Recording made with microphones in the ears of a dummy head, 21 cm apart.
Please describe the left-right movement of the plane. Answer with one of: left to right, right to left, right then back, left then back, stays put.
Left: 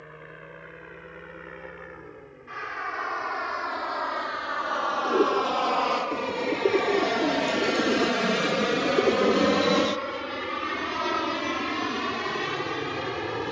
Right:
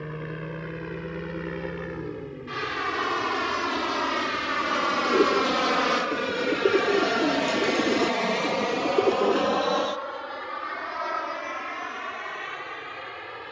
right to left.